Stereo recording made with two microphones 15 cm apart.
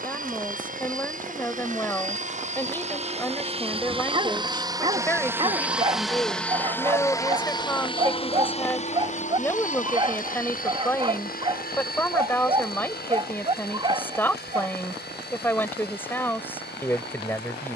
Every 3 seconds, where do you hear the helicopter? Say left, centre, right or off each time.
right, right, left, left, left, left.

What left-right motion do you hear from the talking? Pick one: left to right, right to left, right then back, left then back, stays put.
stays put.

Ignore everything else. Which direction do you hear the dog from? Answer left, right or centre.
right.